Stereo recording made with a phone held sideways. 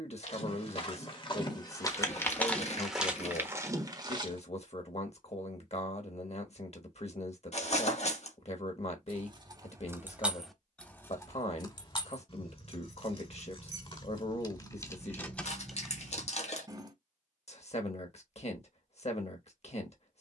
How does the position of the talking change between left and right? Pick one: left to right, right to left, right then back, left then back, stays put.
stays put.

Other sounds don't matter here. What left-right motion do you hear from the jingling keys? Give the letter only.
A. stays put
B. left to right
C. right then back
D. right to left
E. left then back
E.